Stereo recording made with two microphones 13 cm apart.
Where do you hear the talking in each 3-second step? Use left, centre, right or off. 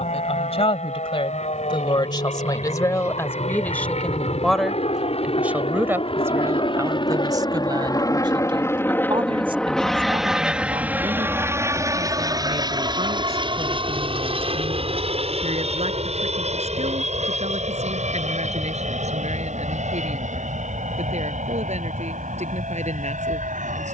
left, centre, right, right, right, right, right, right.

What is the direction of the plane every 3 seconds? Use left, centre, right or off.
left, left, left, centre, right, right, right, right.